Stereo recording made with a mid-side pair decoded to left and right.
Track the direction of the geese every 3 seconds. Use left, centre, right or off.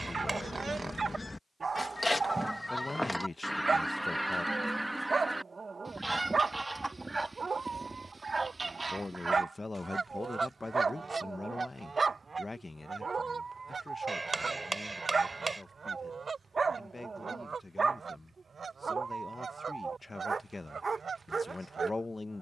left, centre, right, right, right, right, right, right.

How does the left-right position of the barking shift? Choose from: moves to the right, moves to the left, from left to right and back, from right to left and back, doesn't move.
doesn't move.